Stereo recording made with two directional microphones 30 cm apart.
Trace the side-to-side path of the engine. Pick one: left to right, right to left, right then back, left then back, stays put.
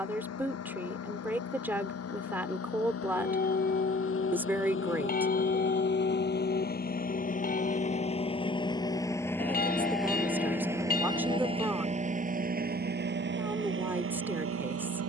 left to right.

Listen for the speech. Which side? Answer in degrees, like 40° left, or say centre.
10° right.